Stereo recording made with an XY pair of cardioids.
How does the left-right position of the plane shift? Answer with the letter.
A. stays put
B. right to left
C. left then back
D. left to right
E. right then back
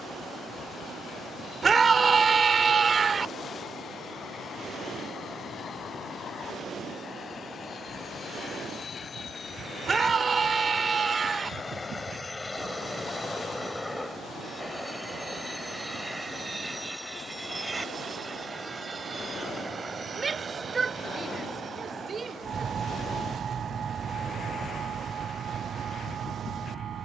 D.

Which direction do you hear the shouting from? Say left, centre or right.
right.